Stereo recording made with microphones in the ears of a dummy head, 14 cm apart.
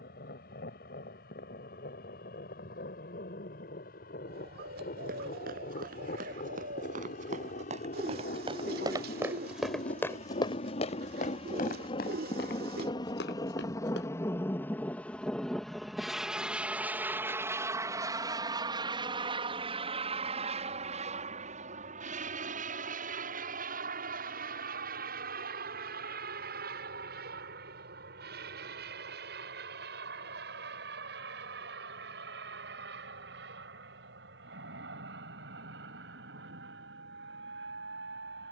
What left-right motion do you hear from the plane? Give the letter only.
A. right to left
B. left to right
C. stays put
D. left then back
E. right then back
B.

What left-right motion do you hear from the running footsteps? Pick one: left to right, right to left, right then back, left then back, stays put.
right to left.